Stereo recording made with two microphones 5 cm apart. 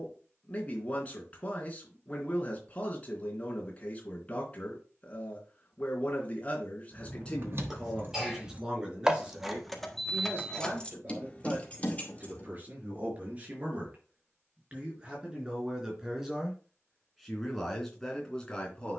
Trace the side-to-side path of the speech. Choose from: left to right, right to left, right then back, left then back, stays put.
right then back.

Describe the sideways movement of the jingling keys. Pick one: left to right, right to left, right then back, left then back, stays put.
right to left.